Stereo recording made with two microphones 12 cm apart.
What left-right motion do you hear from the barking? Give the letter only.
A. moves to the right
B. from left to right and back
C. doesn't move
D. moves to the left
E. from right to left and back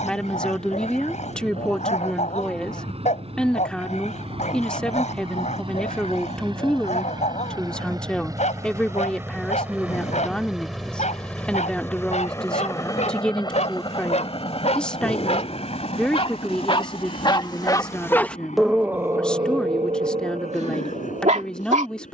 A.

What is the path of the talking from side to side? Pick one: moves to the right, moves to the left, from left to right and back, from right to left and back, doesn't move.
doesn't move.